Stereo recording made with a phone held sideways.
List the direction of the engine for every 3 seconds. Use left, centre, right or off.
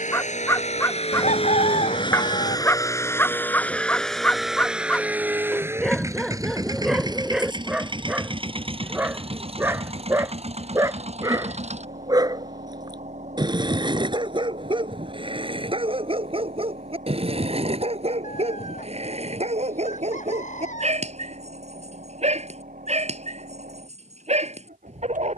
left, centre, right, right, right, right, right, right, right.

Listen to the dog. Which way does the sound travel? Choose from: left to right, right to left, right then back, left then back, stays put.
left to right.